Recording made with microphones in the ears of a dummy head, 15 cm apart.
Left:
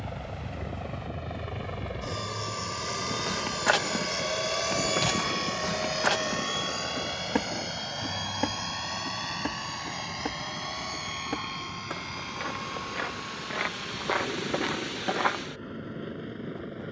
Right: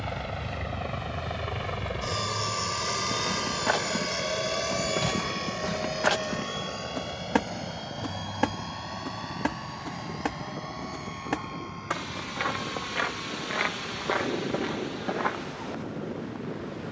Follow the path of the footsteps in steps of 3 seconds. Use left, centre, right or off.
off, left, centre, right, centre, left.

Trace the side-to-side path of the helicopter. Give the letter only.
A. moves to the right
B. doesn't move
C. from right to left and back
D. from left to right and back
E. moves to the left
E.